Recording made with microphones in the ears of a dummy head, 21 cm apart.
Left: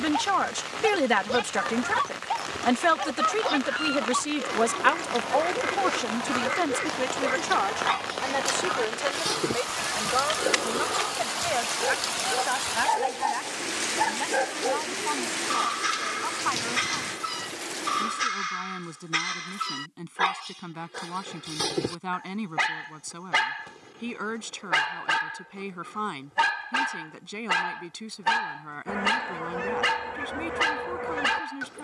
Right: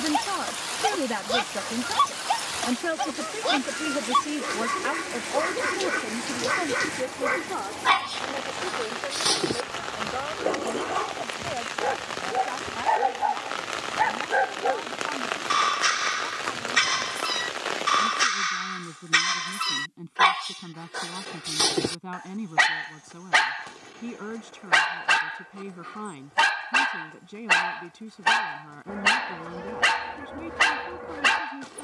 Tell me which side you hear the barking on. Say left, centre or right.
right.